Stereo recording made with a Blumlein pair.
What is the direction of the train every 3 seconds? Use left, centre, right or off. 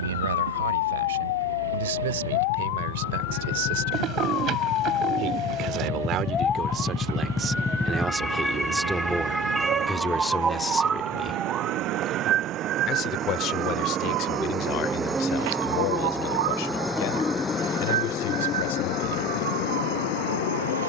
right, right, right, right, right, centre, left.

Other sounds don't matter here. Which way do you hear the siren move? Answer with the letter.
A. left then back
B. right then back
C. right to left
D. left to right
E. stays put
D.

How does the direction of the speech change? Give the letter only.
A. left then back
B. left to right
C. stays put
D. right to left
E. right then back
D.